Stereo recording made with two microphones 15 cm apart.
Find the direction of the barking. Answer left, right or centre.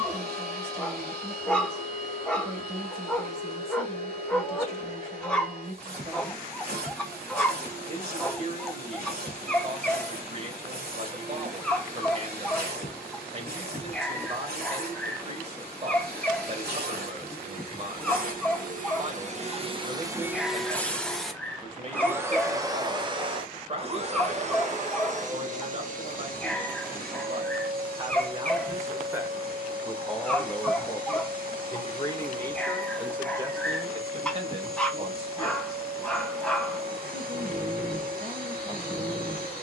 centre.